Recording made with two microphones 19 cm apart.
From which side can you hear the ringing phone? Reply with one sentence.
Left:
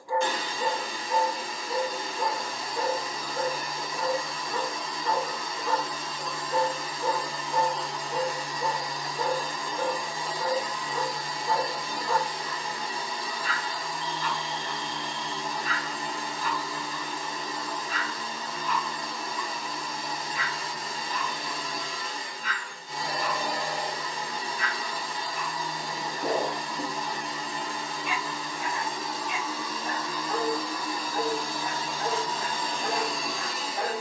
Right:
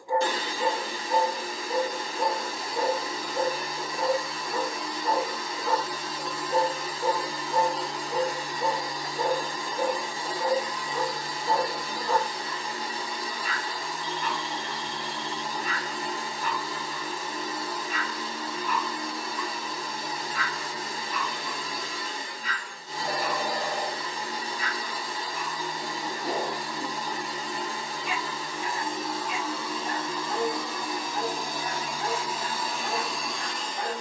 You can hear the ringing phone on the right.